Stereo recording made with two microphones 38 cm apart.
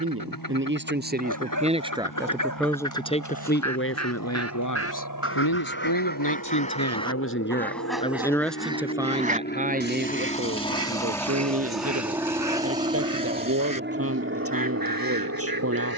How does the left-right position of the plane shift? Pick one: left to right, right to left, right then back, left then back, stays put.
left to right.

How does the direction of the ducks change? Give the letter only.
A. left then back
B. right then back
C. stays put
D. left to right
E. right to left
D.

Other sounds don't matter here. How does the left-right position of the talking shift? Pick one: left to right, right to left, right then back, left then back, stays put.
left then back.